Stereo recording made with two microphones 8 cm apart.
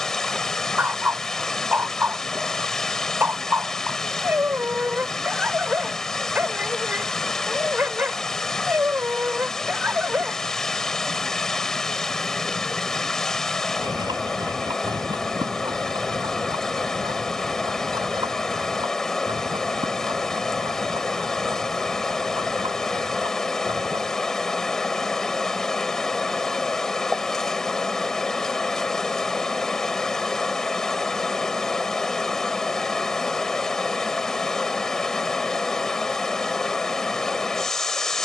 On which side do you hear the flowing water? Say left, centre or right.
centre.